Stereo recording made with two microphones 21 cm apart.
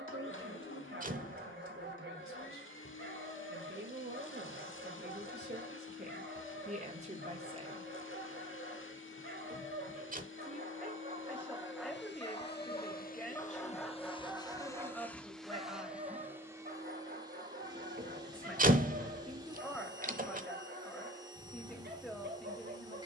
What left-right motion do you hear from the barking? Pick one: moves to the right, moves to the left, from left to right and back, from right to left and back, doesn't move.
from right to left and back.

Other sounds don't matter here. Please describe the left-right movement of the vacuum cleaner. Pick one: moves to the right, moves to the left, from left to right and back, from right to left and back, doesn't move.
moves to the right.